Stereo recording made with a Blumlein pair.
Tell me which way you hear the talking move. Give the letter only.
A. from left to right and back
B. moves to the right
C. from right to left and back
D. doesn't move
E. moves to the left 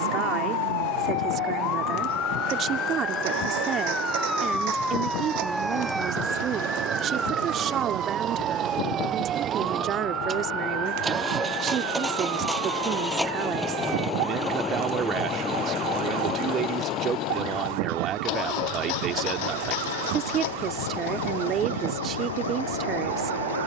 D.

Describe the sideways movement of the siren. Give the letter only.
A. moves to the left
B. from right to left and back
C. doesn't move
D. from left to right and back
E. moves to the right
E.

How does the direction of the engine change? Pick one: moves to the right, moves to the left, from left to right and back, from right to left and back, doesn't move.
moves to the left.